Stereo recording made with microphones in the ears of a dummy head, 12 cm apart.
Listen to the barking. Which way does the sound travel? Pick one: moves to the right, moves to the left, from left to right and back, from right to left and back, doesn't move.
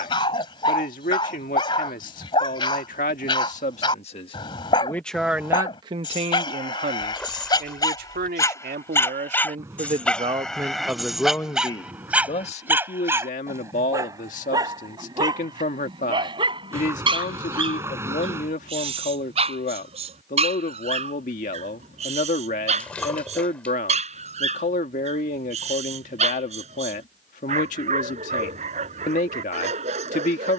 moves to the right.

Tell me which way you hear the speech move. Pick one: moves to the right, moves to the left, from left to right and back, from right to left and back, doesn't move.
from left to right and back.